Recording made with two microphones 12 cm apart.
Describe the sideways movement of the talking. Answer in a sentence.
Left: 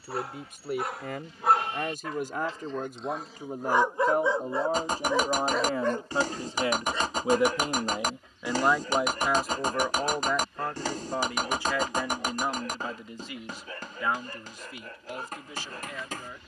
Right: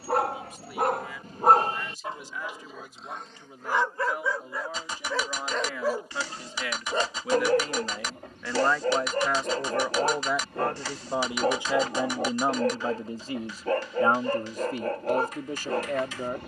In this clip you hear the talking travel towards the right.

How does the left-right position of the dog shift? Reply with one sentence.
You can hear the dog go left and come back.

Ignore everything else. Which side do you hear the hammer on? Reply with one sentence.
In this clip you hear the hammer on the left.